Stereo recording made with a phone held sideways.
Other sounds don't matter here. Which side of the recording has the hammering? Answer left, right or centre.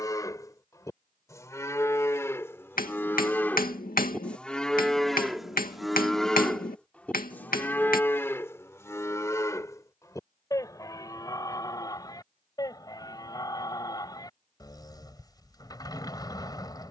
left.